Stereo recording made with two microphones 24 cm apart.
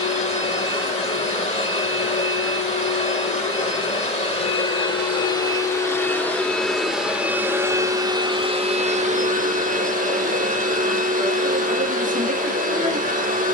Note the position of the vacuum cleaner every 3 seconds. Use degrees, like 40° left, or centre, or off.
30° left, 20° left, 10° right, 30° right, 30° right.